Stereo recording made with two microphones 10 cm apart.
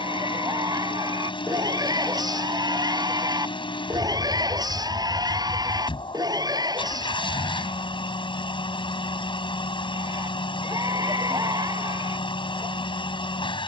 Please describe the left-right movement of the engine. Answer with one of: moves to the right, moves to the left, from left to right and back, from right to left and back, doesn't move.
doesn't move.